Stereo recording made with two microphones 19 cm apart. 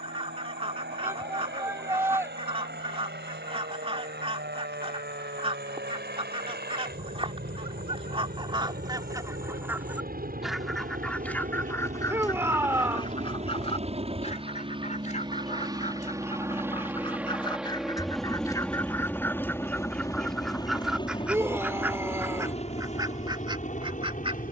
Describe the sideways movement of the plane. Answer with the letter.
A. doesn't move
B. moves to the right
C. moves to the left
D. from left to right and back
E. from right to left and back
C.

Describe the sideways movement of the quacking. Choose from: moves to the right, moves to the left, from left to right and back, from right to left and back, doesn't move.
from right to left and back.